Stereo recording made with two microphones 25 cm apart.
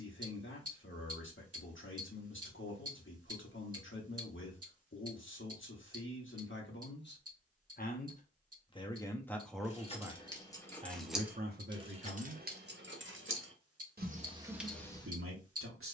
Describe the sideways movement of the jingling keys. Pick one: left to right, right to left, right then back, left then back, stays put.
right then back.